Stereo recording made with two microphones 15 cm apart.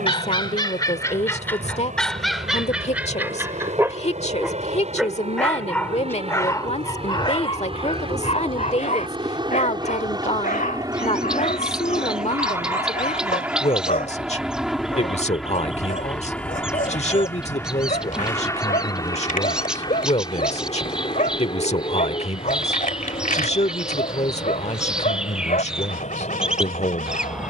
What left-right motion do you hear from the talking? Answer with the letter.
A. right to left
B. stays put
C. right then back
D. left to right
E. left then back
B.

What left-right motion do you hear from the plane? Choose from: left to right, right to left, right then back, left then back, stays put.
right to left.